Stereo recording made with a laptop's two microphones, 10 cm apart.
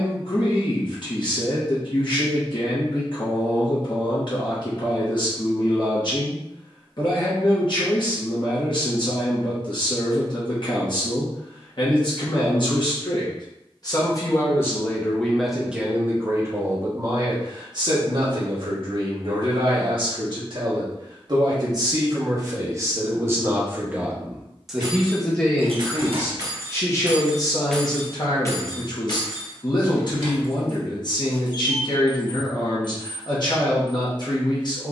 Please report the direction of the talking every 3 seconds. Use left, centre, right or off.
left, left, left, left, left, right, right, right, centre, left, left, left.